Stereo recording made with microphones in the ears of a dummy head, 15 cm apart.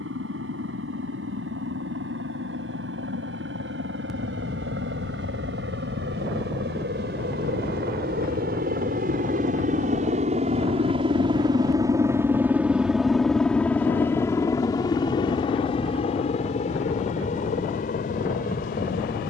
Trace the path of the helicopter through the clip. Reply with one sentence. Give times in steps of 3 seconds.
You can hear the helicopter on the right from 0 s, in the centre from 12 s and on the left from 15 s.